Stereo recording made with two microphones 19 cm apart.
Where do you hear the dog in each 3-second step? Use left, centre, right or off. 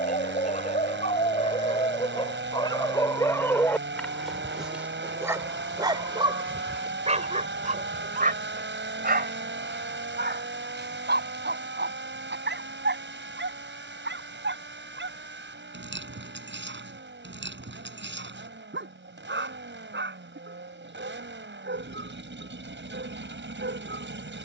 left, centre, right, right, right, right, right, right.